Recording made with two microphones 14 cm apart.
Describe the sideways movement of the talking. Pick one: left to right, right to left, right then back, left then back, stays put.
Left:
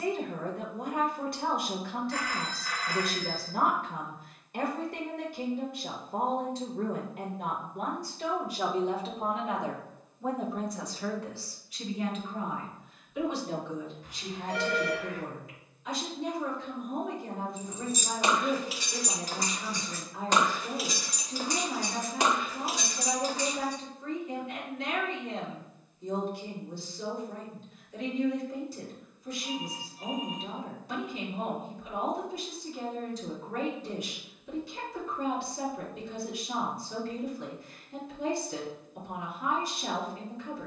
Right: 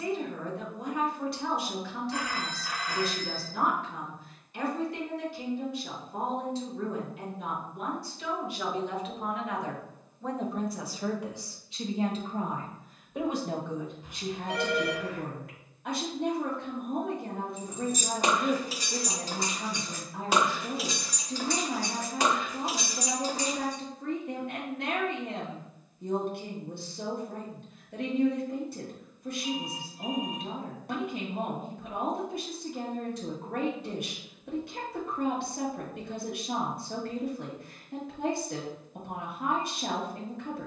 left to right.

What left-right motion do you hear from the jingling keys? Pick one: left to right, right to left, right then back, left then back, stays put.
left then back.